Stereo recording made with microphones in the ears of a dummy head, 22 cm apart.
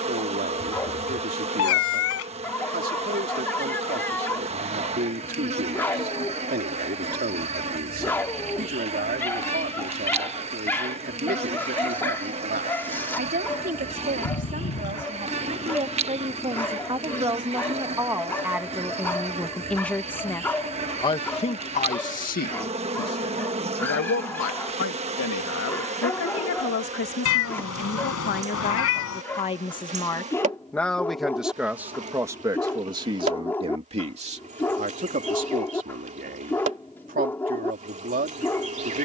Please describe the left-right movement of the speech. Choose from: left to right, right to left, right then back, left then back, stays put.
left then back.